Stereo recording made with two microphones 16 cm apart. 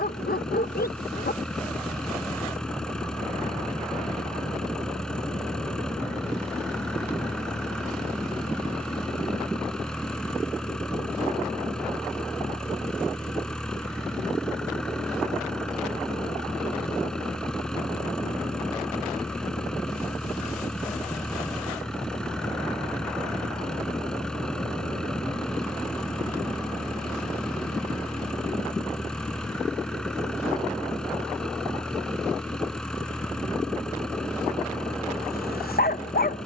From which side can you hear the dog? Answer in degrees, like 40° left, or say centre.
80° left.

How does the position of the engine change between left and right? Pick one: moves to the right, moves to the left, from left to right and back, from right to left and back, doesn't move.
doesn't move.